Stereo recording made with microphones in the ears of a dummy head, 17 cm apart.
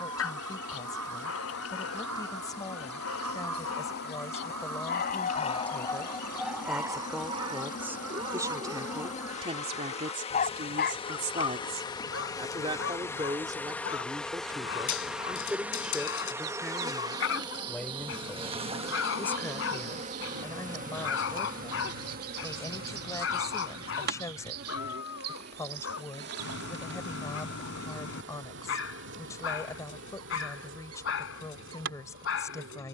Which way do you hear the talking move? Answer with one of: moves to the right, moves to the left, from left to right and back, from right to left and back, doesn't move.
from left to right and back.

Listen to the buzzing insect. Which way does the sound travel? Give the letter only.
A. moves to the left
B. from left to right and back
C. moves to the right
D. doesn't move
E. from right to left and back
C.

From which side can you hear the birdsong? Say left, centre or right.
right.